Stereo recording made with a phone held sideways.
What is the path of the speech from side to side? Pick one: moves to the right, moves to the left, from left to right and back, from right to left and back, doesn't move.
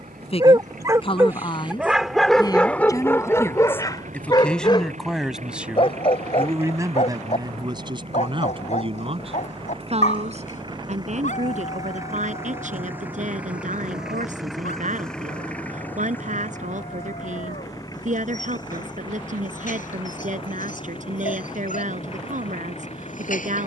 moves to the right.